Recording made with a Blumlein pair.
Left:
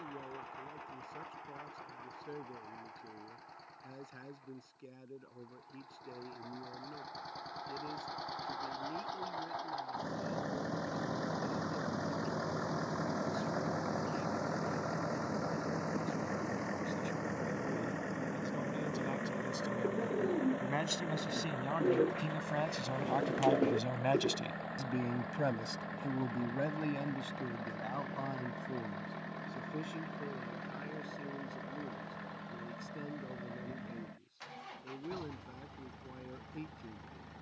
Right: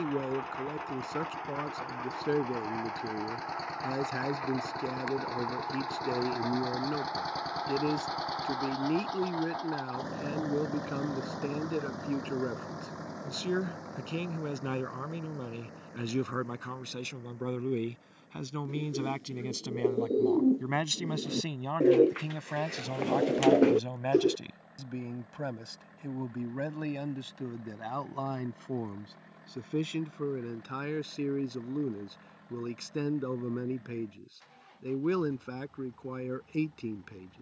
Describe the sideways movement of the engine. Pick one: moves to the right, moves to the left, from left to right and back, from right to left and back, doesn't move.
moves to the left.